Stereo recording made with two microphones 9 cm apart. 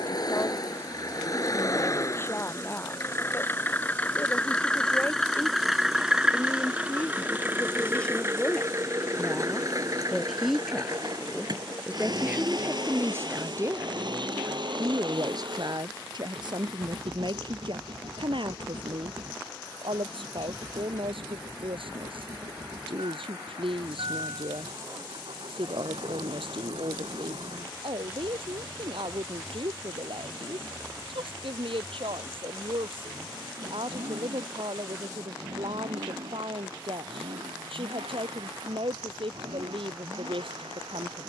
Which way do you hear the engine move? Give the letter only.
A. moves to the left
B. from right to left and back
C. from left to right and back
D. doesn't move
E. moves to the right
E.